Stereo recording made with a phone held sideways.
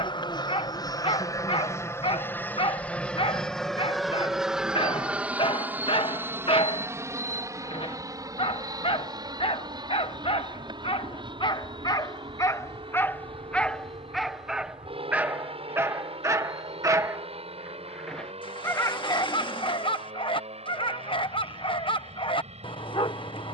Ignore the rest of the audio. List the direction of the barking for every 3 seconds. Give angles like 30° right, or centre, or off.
40° left, 40° left, 40° left, 40° left, 10° left, 20° right, 30° left, 40° left.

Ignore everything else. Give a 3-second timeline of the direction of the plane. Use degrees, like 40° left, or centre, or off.
20° left, centre, 20° right, 30° right, 40° right, 40° right, 50° right, 50° right.